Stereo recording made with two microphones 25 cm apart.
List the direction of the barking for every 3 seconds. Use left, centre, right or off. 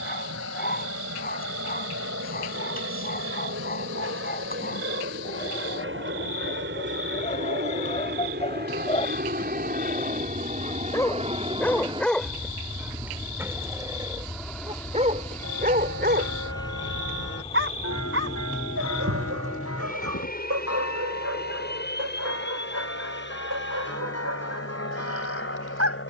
left, left, left, centre, centre, right, right, right, right.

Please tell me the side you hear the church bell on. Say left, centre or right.
left.